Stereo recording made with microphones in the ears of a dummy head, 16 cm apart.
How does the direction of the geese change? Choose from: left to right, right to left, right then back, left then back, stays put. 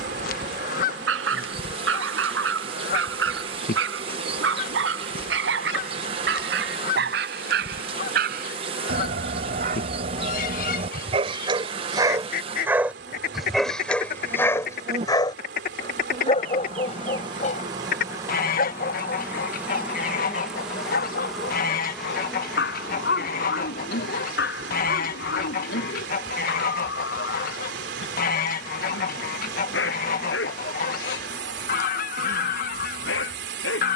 stays put.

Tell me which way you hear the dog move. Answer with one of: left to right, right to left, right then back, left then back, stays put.
right to left.